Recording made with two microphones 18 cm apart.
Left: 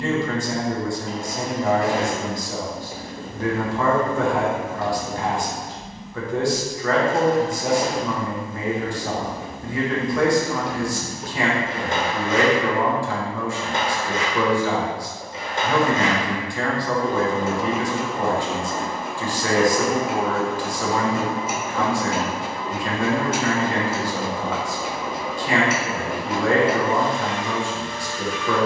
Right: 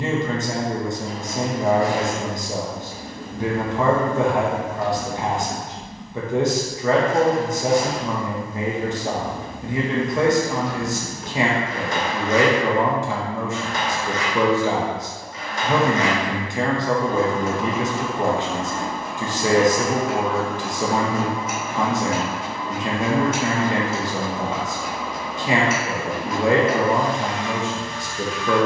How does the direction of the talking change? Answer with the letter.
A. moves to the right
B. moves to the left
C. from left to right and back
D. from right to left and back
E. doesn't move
E.